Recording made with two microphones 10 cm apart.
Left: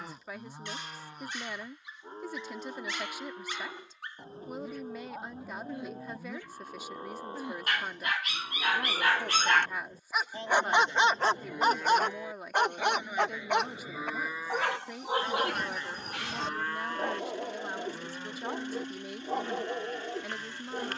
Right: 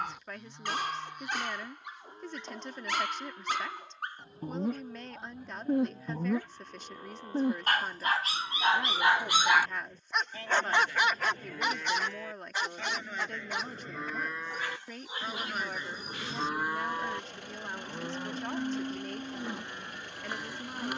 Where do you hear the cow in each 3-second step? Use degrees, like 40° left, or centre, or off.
30° left, 30° left, 30° left, 20° left, 10° left, 10° right, 20° right.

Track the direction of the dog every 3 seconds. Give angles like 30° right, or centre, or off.
70° right, 60° right, 40° right, 10° left, 60° left, 80° left, 80° left.